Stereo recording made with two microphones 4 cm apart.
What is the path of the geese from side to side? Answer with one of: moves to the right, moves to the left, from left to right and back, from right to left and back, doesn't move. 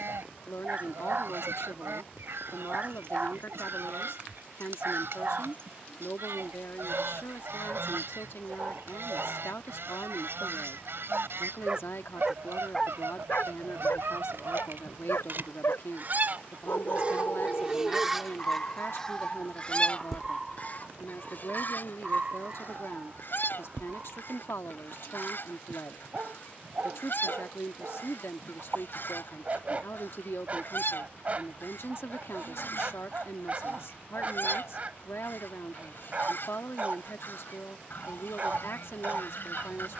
moves to the left.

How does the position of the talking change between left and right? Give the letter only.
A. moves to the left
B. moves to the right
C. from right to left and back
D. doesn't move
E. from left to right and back
D.